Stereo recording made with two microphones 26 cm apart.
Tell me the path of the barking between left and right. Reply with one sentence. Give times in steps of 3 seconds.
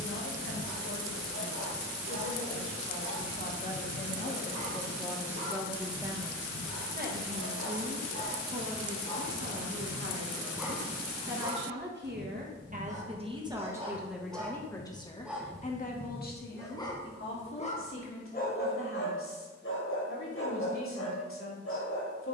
You can hear the barking on the left from 0 s, in the centre from 9 s, on the right from 12 s, in the centre from 15 s and on the left from 18 s.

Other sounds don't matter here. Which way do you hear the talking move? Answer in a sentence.
You can hear the talking go right and come back.